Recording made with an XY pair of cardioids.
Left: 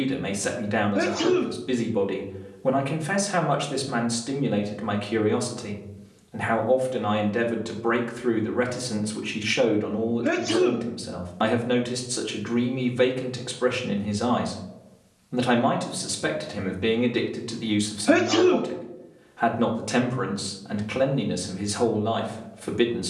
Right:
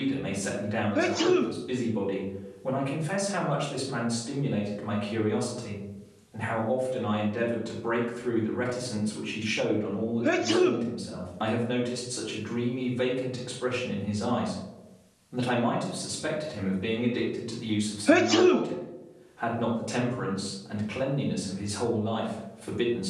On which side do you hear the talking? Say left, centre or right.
left.